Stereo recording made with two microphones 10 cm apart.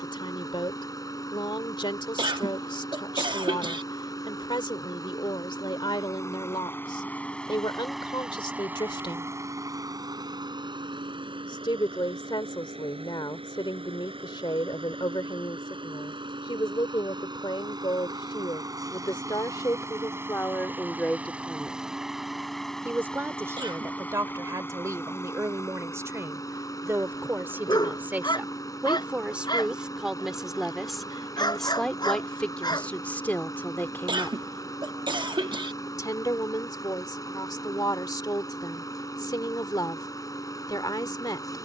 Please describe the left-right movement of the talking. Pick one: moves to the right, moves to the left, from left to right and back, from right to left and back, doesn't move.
from left to right and back.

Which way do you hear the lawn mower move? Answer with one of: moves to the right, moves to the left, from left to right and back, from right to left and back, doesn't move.
from left to right and back.